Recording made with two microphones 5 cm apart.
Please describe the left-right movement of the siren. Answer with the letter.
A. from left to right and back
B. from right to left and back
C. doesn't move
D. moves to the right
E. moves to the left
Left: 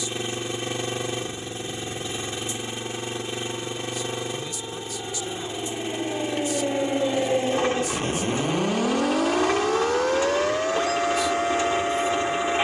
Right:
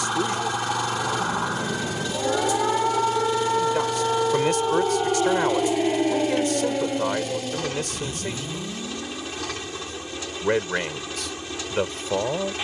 E.